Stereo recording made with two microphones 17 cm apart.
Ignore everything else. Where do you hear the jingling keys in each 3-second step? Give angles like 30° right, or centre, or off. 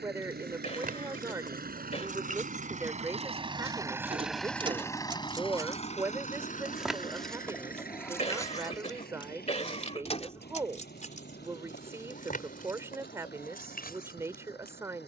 50° right, 30° right, 10° left, 40° left, 60° left.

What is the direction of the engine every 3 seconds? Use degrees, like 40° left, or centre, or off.
60° right, centre, 60° left, 70° left, 80° left.